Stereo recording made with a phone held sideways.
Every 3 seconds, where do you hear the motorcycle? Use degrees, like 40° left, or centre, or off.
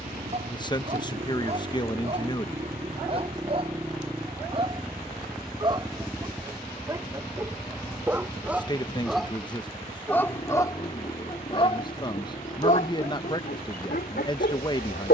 30° right, 10° right, 20° left, 30° left, 40° left.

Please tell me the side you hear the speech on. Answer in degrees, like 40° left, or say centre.
30° left.